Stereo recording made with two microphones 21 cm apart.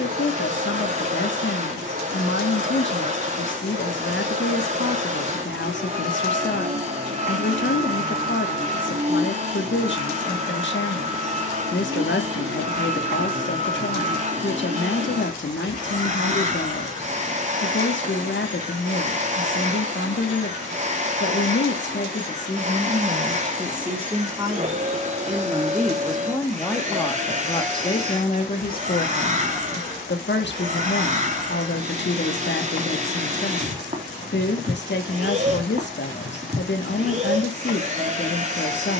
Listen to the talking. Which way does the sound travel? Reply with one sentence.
You can hear the talking go right and come back.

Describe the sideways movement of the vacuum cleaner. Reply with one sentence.
In this clip you hear the vacuum cleaner stay in one place.